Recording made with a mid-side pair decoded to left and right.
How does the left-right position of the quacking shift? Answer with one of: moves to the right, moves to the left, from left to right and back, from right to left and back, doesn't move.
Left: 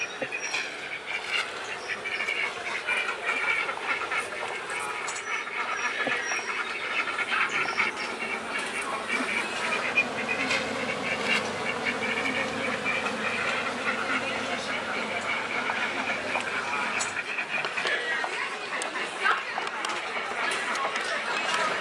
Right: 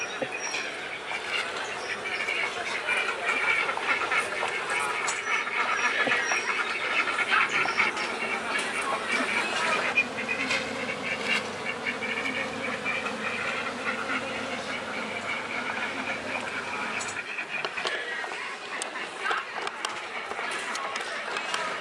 from left to right and back.